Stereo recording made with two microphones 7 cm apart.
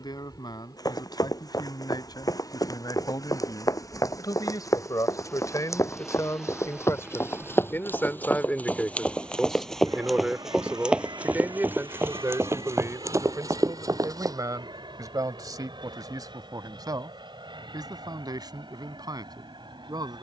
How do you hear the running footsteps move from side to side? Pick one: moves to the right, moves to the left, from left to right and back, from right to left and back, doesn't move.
moves to the right.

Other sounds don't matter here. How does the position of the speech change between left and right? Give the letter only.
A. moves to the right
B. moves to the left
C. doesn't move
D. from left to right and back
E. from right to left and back
A.